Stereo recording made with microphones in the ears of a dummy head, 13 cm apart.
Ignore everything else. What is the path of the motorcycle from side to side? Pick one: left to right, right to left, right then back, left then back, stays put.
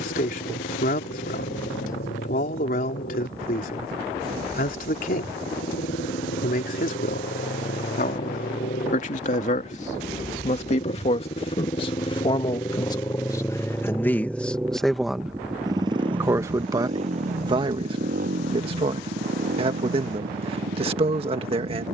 left to right.